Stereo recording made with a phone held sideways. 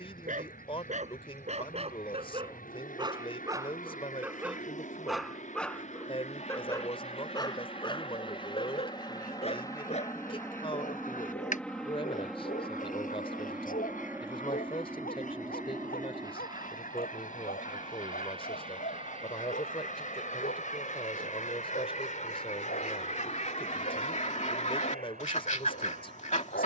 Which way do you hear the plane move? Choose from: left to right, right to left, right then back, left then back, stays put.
left to right.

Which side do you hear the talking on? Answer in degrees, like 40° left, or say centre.
30° left.